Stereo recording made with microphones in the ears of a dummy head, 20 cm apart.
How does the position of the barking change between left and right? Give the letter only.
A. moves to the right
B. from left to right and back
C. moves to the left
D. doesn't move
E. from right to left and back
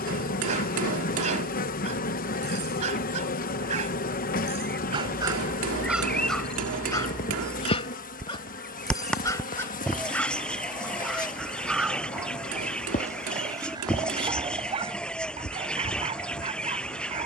E.